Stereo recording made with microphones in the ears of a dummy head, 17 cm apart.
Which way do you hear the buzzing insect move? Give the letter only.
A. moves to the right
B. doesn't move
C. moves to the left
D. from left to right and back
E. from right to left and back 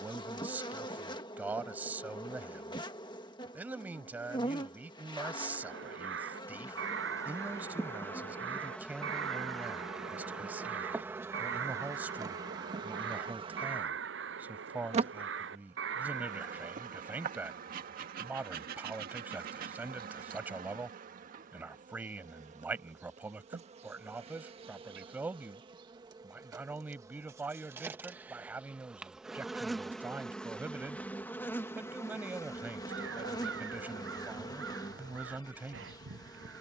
D.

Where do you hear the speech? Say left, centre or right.
centre.